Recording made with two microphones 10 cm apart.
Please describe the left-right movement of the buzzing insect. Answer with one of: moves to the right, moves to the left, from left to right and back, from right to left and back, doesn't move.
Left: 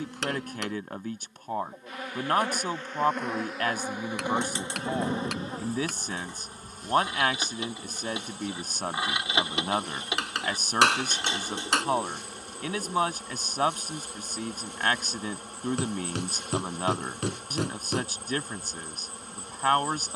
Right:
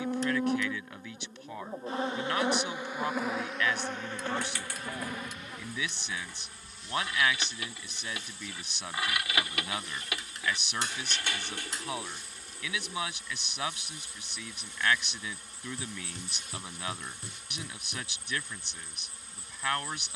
moves to the left.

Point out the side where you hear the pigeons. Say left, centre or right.
left.